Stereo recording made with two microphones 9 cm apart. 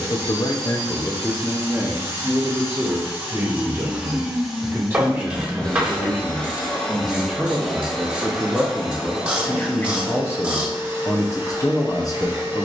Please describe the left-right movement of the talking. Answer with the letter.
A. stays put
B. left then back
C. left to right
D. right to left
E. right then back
E.